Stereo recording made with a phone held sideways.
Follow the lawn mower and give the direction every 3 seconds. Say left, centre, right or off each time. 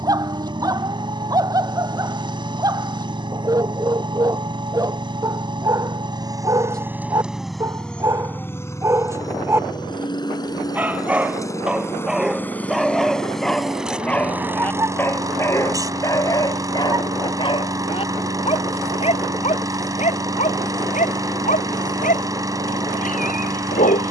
right, right, centre, left, centre, right, right, right.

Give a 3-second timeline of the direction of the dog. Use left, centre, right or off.
right, right, right, centre, centre, left, left, left.